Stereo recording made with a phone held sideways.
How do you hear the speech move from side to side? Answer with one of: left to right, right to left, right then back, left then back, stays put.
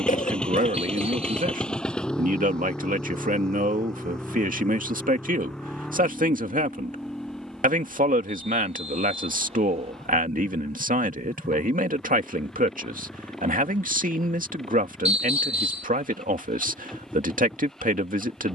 stays put.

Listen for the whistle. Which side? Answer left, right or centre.
right.